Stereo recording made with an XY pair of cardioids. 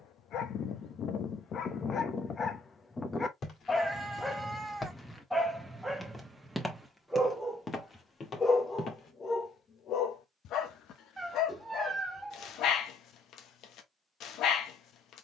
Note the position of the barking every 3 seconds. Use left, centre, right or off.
left, centre, centre, left, left.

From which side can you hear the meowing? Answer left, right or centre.
centre.